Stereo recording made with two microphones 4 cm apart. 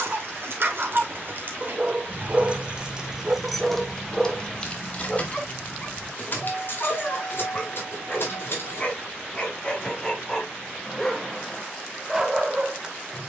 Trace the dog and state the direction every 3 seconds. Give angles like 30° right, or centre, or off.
30° right, centre, 30° left, 10° left, 10° right.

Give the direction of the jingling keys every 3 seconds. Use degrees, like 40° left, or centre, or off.
50° right, 20° left, 50° left, off, off.